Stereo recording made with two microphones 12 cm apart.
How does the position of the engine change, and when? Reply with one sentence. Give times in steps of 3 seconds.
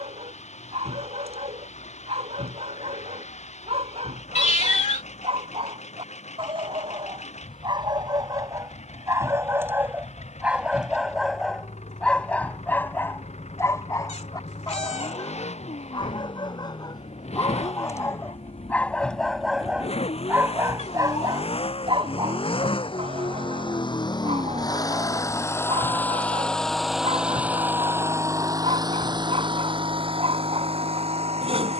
In this clip you hear the engine on the left from 0 s and on the right from 27 s.